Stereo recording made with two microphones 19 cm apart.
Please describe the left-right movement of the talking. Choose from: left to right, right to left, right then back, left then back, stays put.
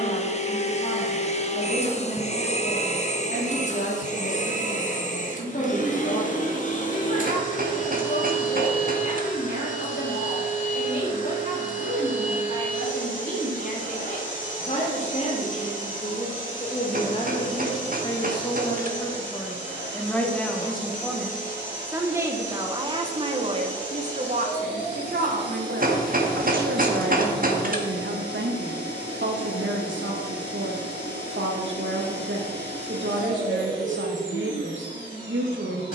left to right.